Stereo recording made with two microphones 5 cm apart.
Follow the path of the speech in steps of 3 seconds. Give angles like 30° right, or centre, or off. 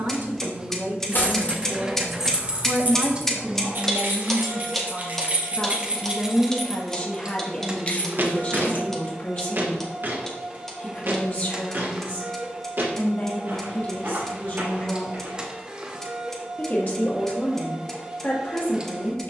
50° right, 10° right, 30° left, 40° left, 40° left, 40° left, 40° left.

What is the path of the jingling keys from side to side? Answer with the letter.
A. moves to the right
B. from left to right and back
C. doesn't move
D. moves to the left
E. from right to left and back
B.